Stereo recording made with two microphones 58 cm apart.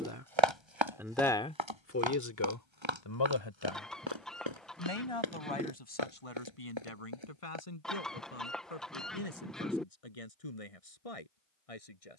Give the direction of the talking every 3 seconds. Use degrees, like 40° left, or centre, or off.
10° left, 60° left, 70° left, 70° left.